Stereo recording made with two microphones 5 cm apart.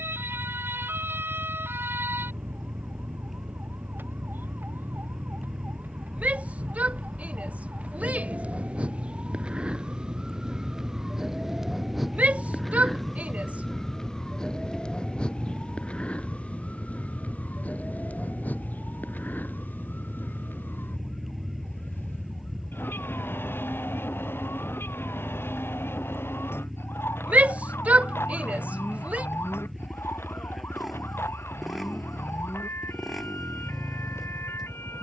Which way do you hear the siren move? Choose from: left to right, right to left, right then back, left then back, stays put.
right to left.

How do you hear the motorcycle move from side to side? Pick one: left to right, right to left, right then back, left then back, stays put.
stays put.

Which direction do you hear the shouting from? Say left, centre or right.
right.